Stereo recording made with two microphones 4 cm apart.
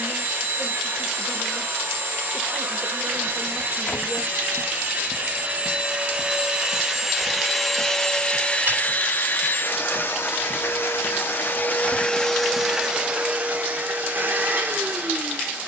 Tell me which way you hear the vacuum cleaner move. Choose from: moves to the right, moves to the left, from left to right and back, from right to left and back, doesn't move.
from right to left and back.